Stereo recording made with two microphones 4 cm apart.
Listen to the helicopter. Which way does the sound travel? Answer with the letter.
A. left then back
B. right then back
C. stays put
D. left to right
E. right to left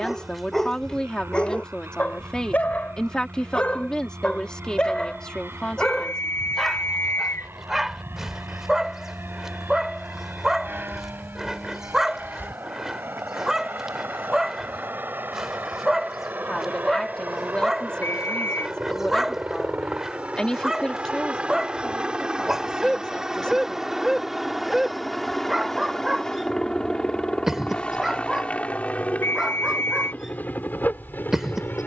E.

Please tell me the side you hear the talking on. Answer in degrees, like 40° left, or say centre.
20° left.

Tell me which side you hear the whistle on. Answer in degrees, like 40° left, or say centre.
70° left.